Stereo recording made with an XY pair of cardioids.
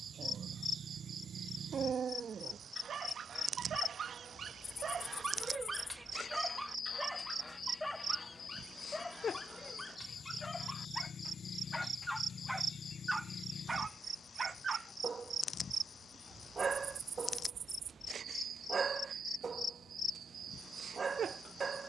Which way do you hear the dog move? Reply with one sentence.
In this clip you hear the dog move from right to left and back again.